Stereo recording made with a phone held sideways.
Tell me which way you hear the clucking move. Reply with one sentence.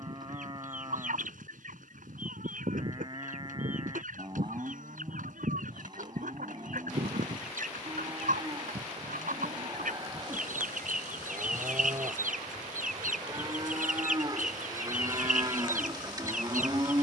In this clip you hear the clucking stay put.